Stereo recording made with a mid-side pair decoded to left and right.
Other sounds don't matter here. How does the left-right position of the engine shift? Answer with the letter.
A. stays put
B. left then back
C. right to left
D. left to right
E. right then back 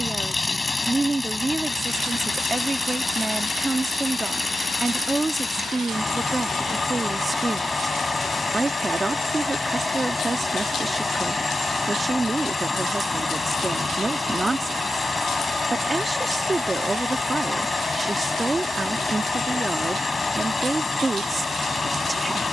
A.